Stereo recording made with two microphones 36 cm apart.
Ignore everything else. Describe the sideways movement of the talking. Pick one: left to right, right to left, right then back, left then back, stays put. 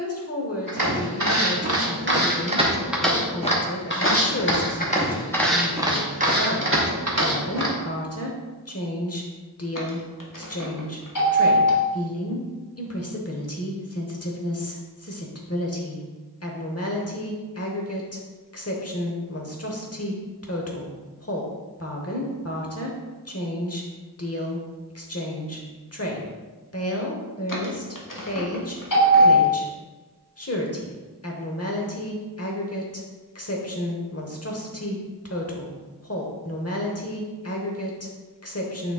stays put.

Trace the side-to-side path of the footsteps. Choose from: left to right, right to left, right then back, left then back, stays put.
left then back.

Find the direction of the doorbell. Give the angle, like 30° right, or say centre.
50° left.